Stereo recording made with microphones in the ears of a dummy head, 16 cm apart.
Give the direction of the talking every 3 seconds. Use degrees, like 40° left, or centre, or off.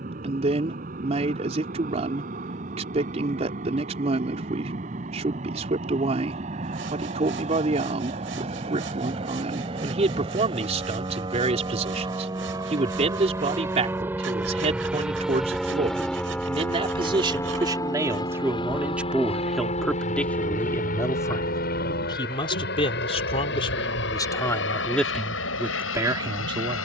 40° right, 40° right, 40° right, 40° right, 40° right, 30° right, centre, 30° left, centre.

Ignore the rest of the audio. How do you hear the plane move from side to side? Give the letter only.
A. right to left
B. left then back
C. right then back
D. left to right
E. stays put
A.